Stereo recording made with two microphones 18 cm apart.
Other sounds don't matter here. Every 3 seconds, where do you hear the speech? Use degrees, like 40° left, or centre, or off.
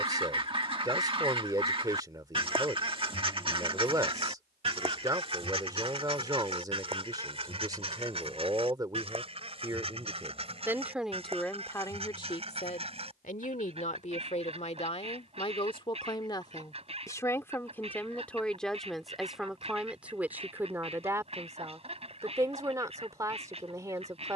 20° right, 20° right, 20° right, 10° right, 40° left, 20° left, centre, 20° right.